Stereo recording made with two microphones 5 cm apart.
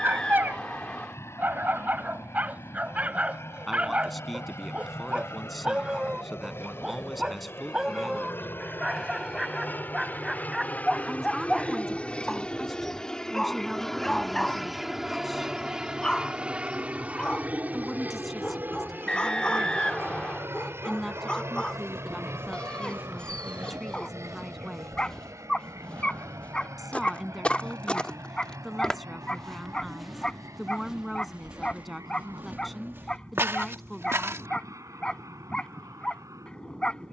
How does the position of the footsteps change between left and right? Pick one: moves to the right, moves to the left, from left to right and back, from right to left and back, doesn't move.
from right to left and back.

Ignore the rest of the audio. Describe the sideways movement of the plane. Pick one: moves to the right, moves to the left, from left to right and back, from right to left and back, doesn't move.
moves to the right.